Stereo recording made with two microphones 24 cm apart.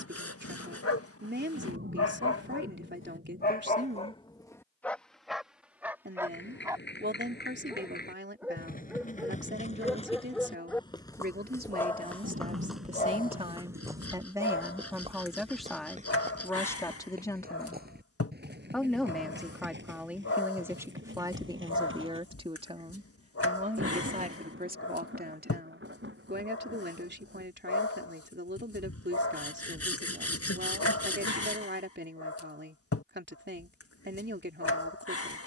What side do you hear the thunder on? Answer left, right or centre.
right.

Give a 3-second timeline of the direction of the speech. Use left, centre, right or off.
right, right, right, right, right, centre, centre, right, right, right, right, right.